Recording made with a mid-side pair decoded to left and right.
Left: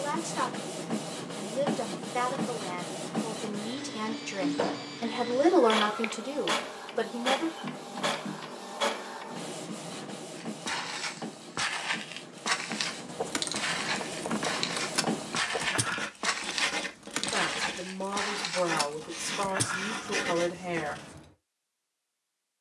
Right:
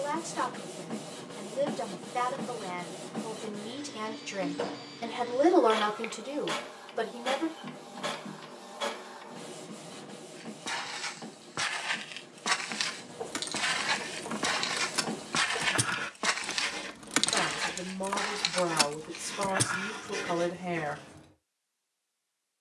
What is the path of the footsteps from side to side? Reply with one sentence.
In this clip you hear the footsteps move from left to right and back again.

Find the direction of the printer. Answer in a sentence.
In this clip you hear the printer on the left.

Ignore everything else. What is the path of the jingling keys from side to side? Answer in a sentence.
In this clip you hear the jingling keys go right and come back.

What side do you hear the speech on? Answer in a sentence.
You can hear the speech on the left.